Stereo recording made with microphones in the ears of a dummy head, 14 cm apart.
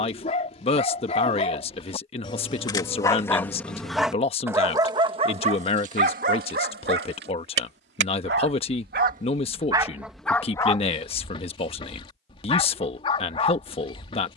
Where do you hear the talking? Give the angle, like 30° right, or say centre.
40° left.